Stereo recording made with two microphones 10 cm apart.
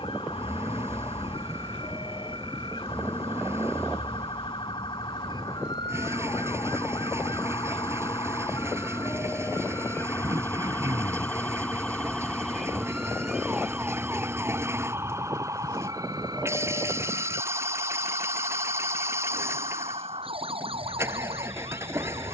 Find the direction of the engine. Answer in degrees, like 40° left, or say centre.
30° right.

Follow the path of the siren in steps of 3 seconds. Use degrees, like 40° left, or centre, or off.
60° left, 50° left, 40° left, 20° left, 10° right, 40° right, 60° right, 70° right.